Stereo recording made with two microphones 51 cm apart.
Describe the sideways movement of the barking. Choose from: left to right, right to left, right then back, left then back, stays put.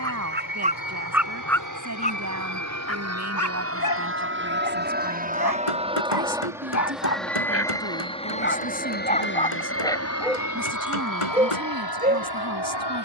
left then back.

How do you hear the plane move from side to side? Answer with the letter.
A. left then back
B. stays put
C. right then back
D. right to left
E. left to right
D.